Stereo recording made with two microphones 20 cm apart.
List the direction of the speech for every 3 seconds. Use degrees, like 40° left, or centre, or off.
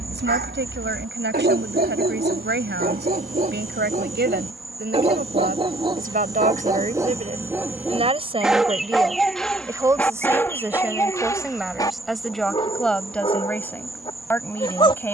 70° right, 60° right, 30° right, 10° right, 10° left.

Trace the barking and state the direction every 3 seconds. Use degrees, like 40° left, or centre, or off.
50° right, 30° right, 10° right, 10° left, 20° left.